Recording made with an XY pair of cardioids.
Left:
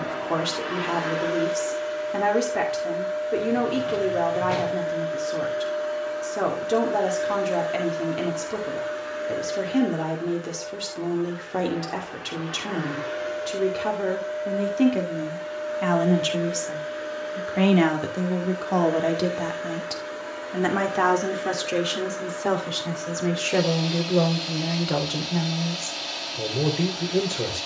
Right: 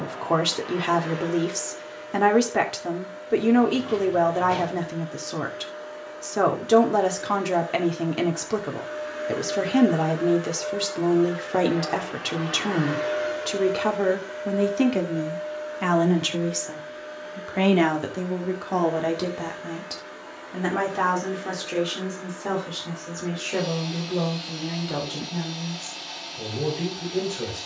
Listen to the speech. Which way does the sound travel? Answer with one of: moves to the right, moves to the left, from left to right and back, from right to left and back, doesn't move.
moves to the left.